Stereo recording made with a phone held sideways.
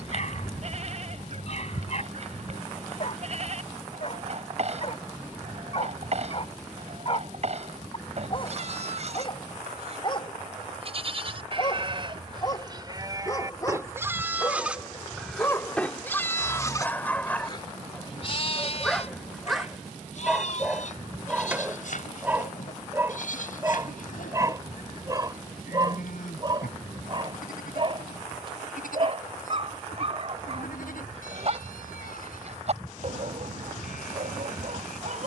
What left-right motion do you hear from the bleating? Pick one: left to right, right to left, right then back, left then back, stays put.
right to left.